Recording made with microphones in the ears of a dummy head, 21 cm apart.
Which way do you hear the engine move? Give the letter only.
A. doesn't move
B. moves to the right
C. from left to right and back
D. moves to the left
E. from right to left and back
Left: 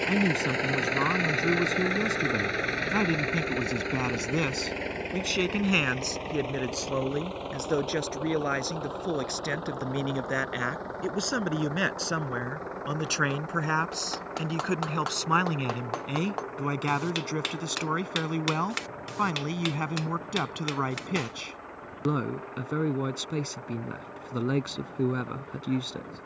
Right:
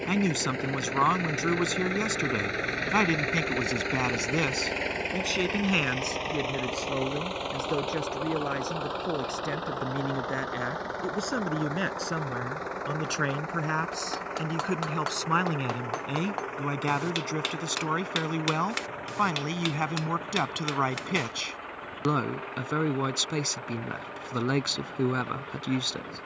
B.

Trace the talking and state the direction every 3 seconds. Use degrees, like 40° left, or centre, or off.
50° right, 20° right, 20° left, 20° left, 10° left, centre, 20° right, 40° right, 40° right.